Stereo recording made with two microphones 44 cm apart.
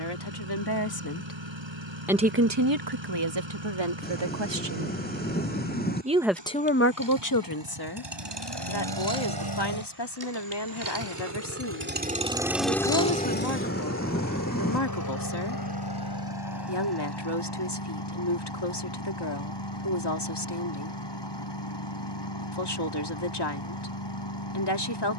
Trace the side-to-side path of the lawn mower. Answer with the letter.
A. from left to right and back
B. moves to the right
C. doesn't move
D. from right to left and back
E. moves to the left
E.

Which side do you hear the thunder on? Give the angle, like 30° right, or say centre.
20° left.